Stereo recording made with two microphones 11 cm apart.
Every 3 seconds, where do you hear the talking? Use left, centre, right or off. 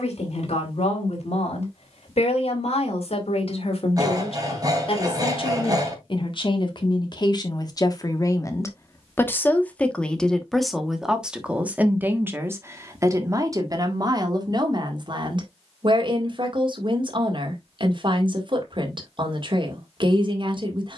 left, left, left, centre, right, right, right.